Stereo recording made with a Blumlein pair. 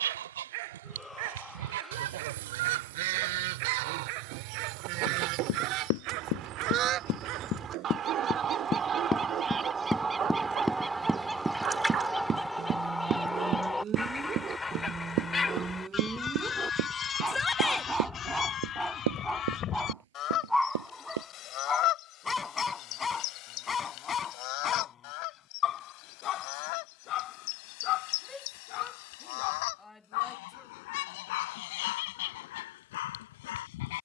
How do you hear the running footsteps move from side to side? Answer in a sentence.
You can hear the running footsteps travel towards the right.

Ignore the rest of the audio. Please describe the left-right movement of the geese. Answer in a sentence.
In this clip you hear the geese go from the right side to the left.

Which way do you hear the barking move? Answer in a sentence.
In this clip you hear the barking go from the right side to the left.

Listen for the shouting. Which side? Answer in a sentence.
You can hear the shouting in the centre.